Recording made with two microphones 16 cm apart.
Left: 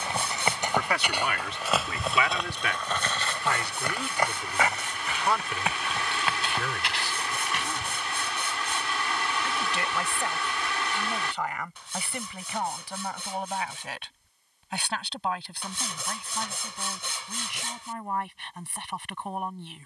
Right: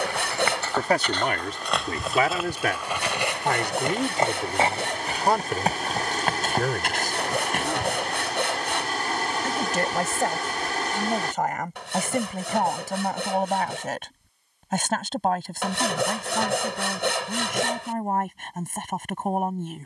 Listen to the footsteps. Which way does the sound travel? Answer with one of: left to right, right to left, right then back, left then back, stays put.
left to right.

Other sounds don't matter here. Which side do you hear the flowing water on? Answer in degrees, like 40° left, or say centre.
50° right.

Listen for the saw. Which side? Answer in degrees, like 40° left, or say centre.
80° right.